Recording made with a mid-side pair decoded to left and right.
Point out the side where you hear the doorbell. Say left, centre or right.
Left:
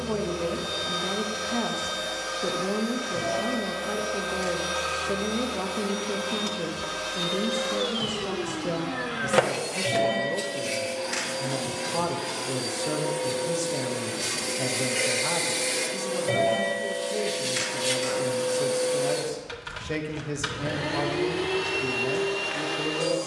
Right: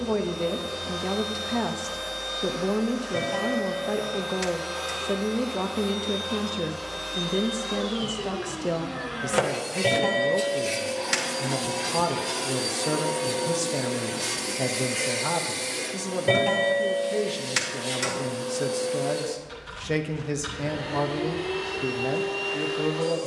right.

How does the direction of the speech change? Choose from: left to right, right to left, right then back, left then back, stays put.
stays put.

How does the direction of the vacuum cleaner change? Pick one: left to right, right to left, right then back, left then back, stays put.
right then back.